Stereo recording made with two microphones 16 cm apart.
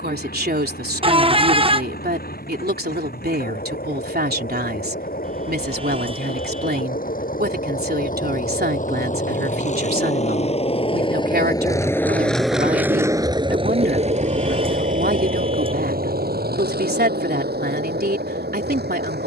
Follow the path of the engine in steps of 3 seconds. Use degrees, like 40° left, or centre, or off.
70° left, 70° left, 60° left, 40° left, 30° right, 70° right, 80° right.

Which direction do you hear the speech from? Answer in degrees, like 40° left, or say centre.
80° right.